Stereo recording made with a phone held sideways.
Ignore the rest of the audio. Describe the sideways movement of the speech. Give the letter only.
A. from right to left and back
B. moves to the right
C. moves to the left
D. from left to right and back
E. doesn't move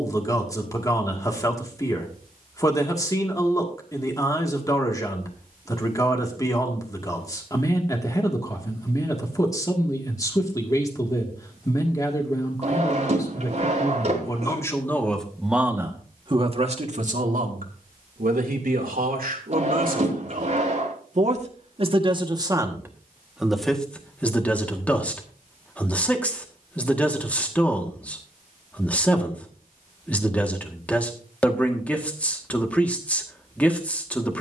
D.